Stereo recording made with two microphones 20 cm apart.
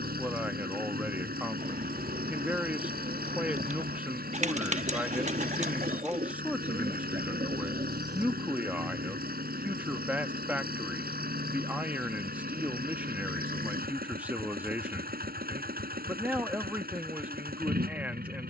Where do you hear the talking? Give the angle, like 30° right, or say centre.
10° right.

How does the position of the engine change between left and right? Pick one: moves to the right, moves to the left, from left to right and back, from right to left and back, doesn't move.
doesn't move.